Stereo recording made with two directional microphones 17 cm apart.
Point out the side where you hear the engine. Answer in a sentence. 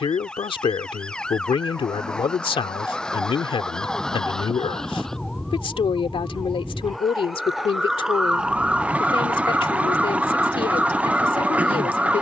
You can hear the engine in the centre.